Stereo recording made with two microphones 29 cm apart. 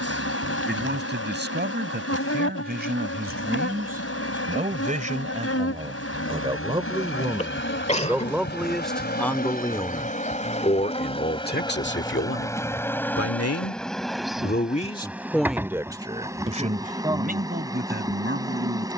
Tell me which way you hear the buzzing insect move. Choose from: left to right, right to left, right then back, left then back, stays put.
left to right.